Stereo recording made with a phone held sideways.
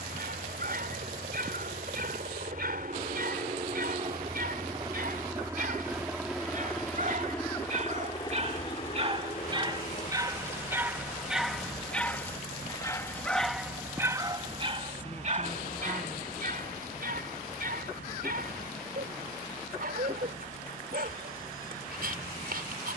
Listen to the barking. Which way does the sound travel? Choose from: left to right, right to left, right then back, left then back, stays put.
left then back.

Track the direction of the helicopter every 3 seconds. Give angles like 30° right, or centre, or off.
60° right, 30° right, 10° left, 40° left, 60° left, 60° left, 70° left, 70° left.